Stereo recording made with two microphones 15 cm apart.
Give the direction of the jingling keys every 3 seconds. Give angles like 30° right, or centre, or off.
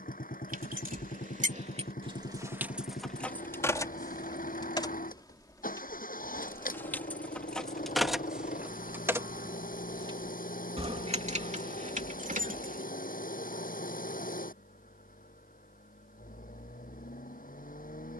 50° right, 20° left, centre, 40° right, 60° right, off.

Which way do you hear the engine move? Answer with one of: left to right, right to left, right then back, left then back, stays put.
stays put.